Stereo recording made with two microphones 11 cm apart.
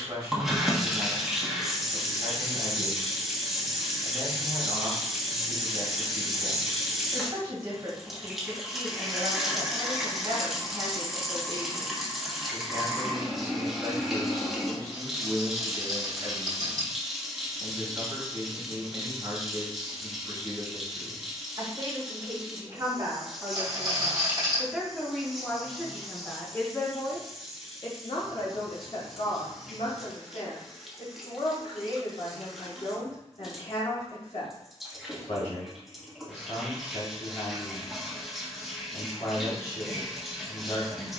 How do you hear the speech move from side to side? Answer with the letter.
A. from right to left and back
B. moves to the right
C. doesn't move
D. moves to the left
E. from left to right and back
D.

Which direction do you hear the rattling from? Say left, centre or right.
right.